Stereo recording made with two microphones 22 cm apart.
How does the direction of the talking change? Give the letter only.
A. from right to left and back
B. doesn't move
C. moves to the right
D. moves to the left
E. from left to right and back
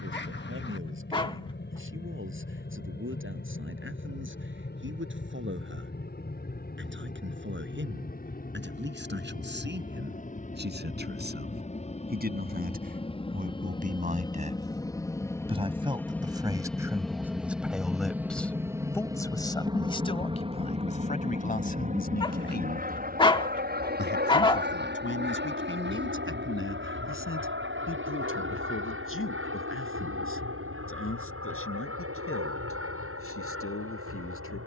D.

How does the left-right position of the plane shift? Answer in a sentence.
You can hear the plane travel towards the right.